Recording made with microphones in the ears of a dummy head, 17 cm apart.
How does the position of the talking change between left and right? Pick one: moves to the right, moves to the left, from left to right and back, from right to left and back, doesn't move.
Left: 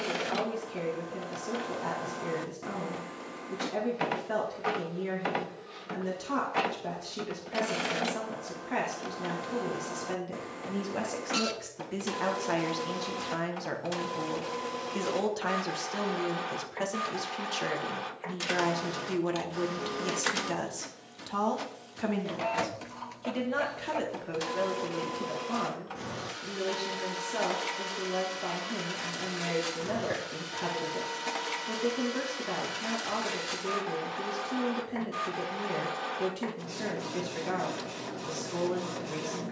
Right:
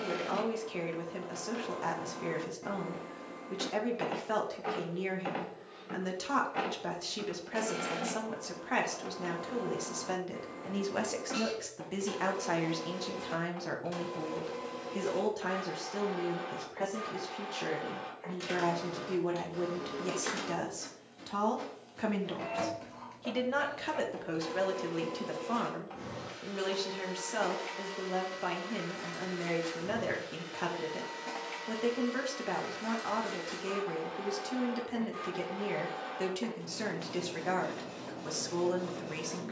from right to left and back.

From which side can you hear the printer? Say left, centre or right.
left.